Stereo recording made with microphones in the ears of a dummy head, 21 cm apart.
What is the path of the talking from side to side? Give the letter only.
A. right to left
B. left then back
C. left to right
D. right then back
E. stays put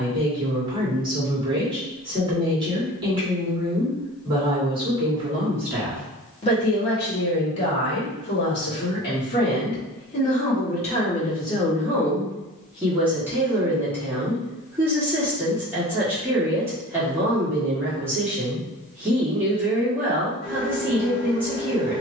B.